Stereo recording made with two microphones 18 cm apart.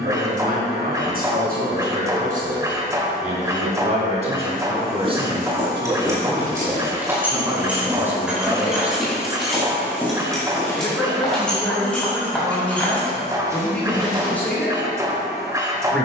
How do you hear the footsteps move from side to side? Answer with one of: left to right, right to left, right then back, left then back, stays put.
left then back.